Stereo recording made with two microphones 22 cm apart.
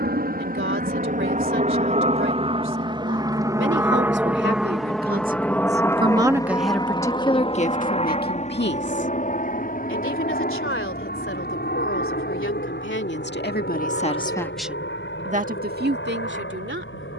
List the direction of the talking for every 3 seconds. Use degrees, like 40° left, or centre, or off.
70° right, 50° right, 30° left, 70° left, 40° left, 50° right.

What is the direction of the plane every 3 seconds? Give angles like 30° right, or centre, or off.
40° right, centre, 20° left, 40° left, 50° left, 50° left.